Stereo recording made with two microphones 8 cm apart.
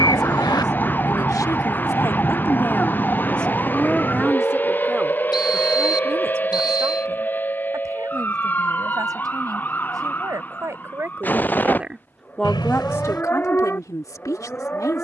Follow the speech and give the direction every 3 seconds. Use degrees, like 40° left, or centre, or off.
50° left, 10° right, 40° right, 40° right, 40° left.